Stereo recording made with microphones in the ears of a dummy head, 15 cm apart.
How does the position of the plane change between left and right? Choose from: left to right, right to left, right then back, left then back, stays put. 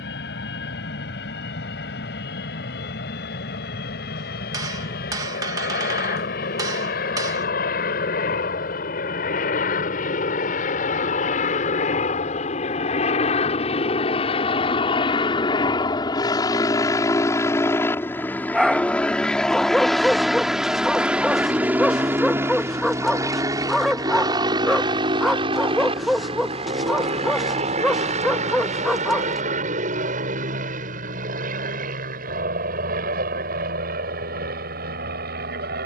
left to right.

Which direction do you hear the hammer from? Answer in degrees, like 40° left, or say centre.
20° right.